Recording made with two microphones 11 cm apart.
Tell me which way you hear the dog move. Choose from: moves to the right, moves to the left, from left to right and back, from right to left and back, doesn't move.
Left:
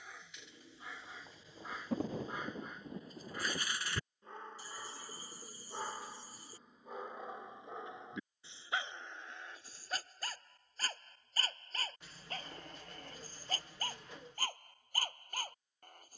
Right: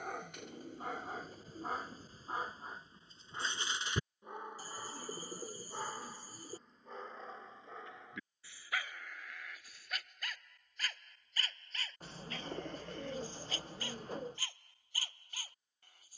moves to the left.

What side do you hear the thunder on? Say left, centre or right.
left.